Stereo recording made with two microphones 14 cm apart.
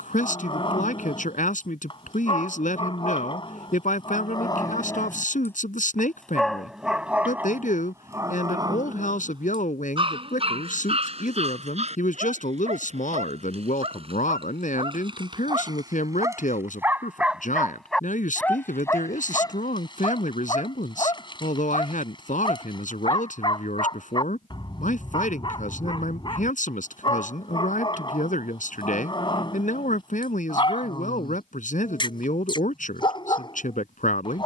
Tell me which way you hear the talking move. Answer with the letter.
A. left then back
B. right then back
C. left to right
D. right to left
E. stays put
E.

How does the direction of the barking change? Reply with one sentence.
In this clip you hear the barking go right and come back.